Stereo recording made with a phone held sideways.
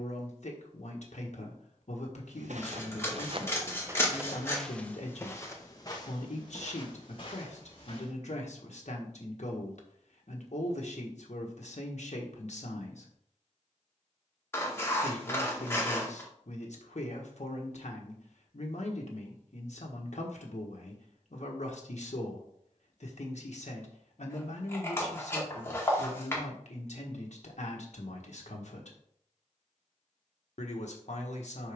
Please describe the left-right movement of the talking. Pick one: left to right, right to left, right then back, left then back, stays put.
stays put.